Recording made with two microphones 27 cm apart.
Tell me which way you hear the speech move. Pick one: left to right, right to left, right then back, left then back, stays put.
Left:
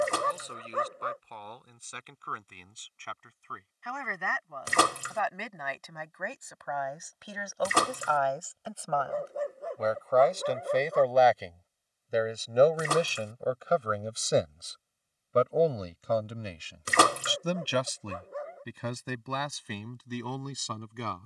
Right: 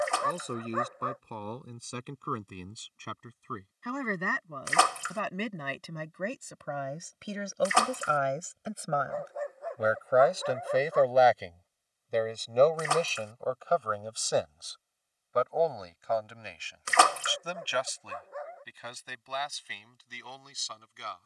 right to left.